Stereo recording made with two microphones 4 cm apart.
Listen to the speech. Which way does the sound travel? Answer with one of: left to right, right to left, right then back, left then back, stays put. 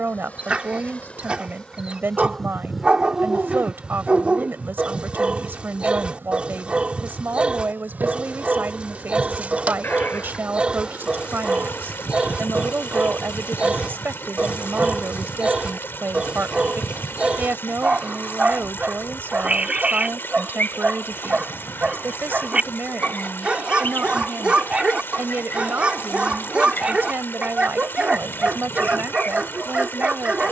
stays put.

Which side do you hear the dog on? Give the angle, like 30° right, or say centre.
30° right.